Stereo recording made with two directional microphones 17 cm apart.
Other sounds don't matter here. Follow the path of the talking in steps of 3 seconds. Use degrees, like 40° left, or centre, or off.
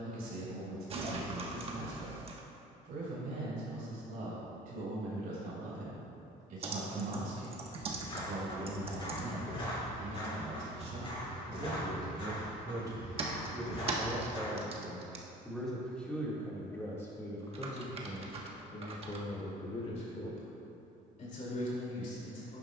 60° right, 60° right, 50° right, 40° right, 20° right, 10° left, 30° left, 50° left.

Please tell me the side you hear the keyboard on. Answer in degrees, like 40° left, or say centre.
40° right.